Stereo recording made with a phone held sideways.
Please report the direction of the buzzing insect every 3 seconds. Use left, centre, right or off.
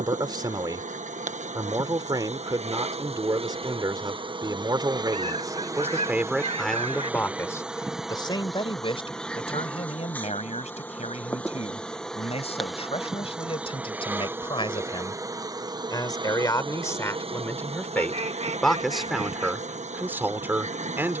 right, right, centre, centre, centre, right, right.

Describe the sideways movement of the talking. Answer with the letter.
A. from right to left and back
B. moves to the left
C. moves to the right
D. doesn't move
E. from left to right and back
A.